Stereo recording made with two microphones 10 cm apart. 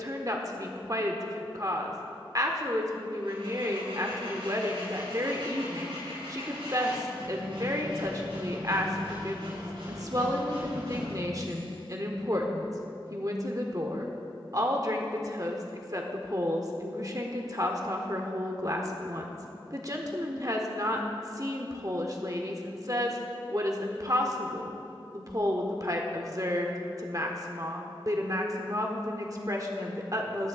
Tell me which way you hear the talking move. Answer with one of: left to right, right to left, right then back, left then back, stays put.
stays put.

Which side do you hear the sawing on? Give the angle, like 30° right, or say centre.
80° right.